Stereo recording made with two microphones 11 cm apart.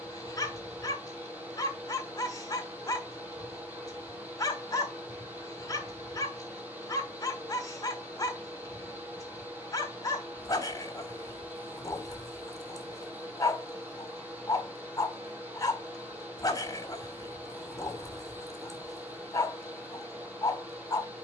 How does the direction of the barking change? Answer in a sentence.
You can hear the barking stay put.